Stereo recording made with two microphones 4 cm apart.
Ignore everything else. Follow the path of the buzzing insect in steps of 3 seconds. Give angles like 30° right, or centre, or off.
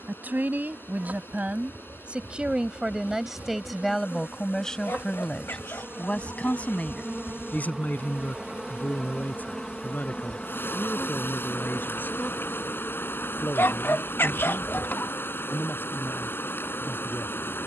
60° right, 40° right, 20° right, 10° left, 40° left, 60° left.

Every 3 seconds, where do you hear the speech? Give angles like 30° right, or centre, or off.
40° right, 10° left, 40° left, 60° left, 60° left, 60° left.